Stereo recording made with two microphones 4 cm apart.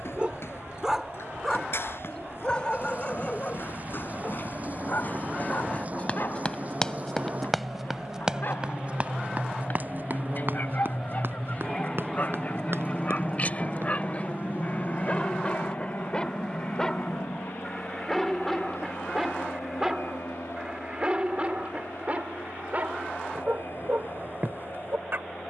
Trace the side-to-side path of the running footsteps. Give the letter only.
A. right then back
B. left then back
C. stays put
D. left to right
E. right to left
D.